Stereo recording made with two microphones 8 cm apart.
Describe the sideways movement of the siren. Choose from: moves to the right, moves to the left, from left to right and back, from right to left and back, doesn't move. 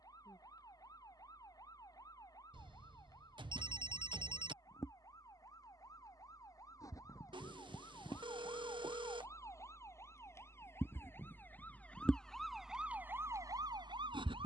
moves to the right.